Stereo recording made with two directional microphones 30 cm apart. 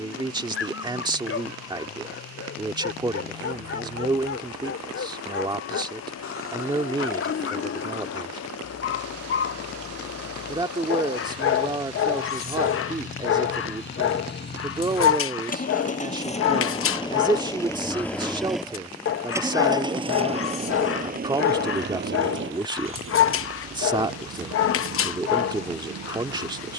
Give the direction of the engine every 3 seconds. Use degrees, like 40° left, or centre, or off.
70° left, 60° left, 60° left, 50° left, 40° left, 20° left, 10° right, 40° right, 60° right.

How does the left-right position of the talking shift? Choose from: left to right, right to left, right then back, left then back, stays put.
stays put.